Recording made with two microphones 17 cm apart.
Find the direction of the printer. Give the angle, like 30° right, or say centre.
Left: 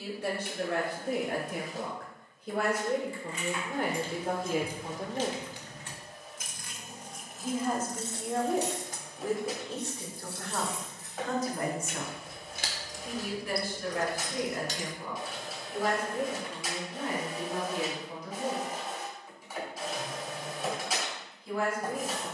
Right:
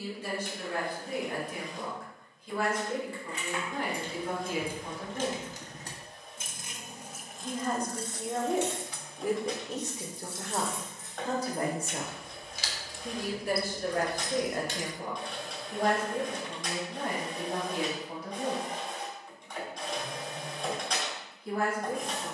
10° left.